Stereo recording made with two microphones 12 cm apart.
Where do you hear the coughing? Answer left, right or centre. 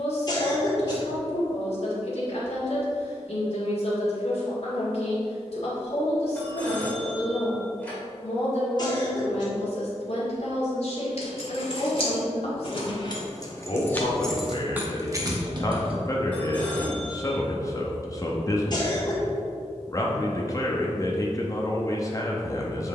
left.